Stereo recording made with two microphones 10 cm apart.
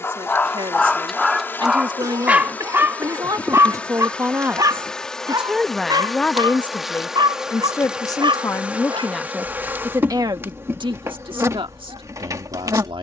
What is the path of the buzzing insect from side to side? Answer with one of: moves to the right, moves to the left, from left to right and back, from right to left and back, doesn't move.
moves to the right.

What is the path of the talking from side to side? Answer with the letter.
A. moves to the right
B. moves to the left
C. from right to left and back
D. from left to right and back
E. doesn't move
C.